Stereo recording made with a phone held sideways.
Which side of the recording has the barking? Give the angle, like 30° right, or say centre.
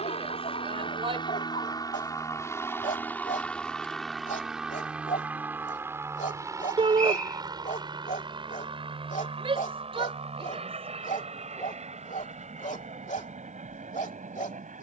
50° left.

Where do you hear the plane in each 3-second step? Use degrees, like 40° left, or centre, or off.
30° left, centre, 20° right, 40° right, 40° right.